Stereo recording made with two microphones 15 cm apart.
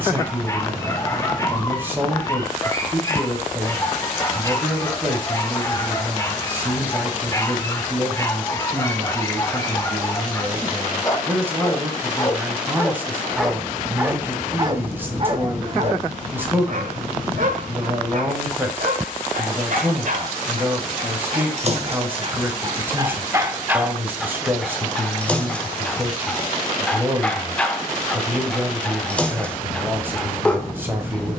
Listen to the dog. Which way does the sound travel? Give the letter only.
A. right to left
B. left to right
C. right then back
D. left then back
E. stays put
C.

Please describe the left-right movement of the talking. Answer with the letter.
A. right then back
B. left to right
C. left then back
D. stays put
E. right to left
D.